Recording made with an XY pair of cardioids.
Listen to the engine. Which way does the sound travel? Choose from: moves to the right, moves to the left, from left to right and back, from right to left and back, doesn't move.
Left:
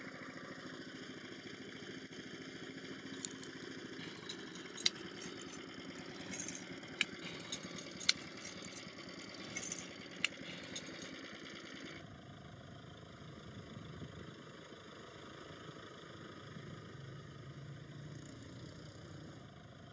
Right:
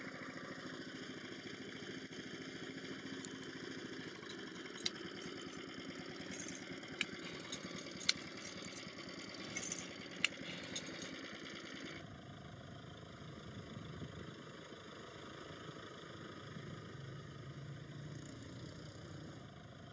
doesn't move.